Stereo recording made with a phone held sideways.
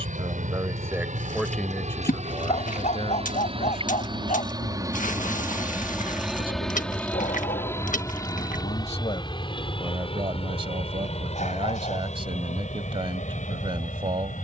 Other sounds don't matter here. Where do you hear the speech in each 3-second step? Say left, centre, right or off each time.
centre, left, left, right, right.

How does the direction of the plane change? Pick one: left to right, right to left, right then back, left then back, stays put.
right to left.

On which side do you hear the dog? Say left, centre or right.
left.